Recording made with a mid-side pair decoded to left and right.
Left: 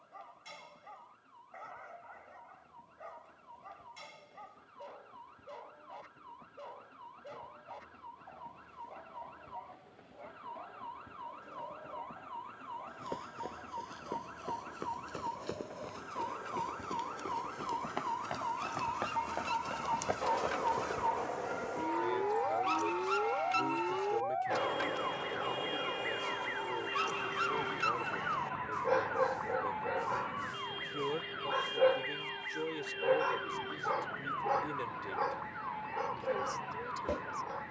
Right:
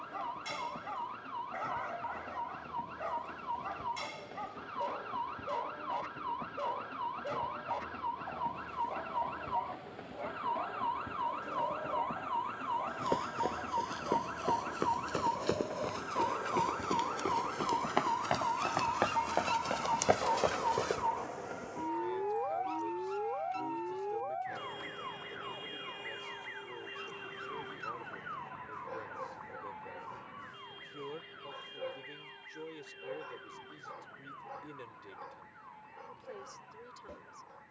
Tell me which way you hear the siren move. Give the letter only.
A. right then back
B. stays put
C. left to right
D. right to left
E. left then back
D.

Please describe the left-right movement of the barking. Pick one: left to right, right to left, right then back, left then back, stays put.
right to left.